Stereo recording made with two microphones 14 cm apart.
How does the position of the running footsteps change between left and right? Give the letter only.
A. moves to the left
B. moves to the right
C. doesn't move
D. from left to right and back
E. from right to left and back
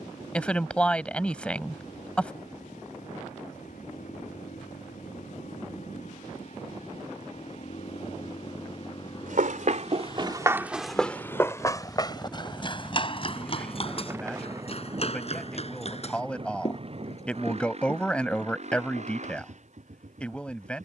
A.